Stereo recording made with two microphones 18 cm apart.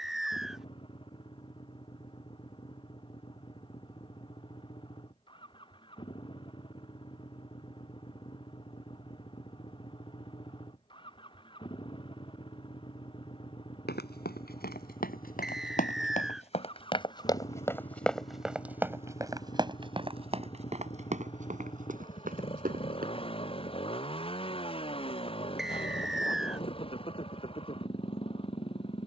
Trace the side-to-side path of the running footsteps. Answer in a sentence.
You can hear the running footsteps go from the left side to the right.